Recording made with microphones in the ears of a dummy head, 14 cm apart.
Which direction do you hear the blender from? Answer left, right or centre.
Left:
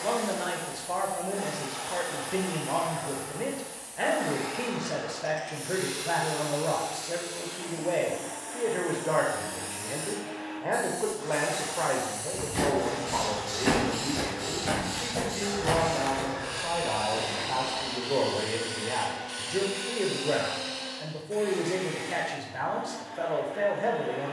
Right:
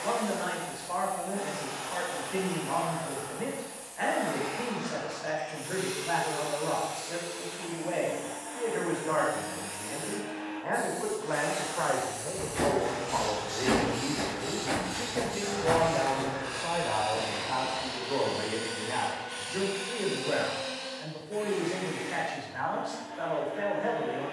left.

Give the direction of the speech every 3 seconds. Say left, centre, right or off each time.
left, left, left, left, centre, centre, left, left.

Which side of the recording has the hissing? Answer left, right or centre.
left.